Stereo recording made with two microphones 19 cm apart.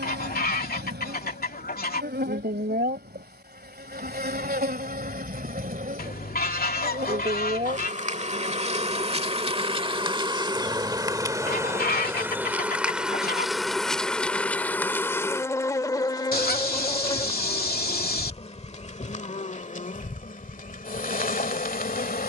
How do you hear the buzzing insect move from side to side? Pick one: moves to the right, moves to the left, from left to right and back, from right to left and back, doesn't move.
moves to the left.